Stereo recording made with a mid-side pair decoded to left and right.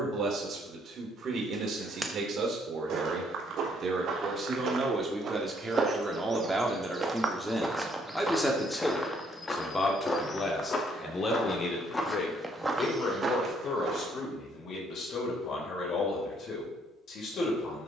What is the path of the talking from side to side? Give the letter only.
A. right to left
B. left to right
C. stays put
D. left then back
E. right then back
A.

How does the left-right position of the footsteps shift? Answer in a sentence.
In this clip you hear the footsteps move from right to left and back again.